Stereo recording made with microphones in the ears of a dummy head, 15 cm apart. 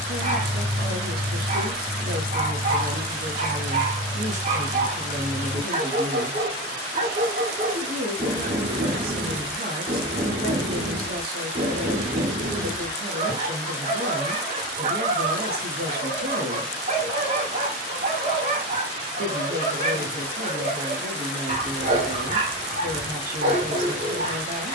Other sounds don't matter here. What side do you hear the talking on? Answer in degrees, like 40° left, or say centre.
60° right.